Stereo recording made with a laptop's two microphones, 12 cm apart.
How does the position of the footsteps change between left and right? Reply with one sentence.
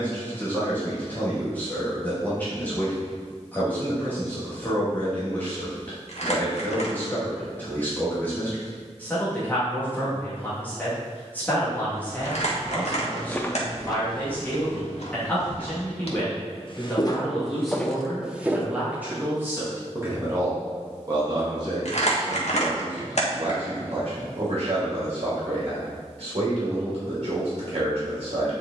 In this clip you hear the footsteps move from right to left and back again.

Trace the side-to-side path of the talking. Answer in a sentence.
You can hear the talking travel towards the right.